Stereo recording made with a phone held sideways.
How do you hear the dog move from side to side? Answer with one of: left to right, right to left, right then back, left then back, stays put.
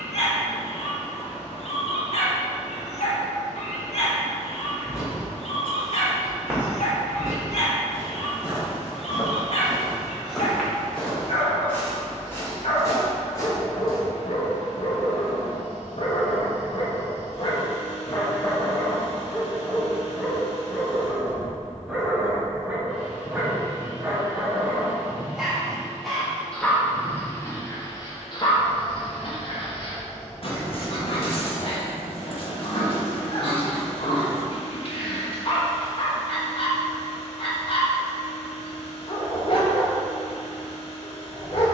right then back.